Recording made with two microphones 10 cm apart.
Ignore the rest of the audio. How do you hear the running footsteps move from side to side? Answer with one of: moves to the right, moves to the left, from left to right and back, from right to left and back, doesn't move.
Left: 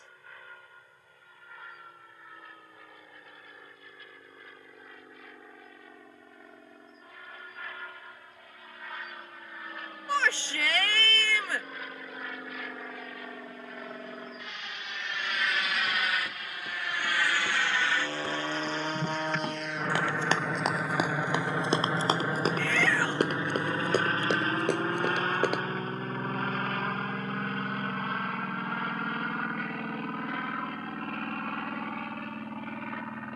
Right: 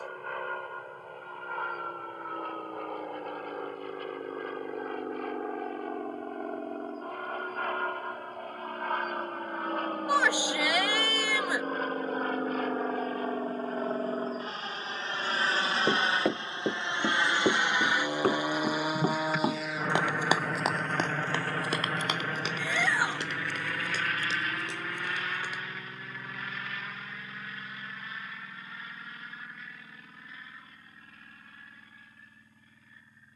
moves to the left.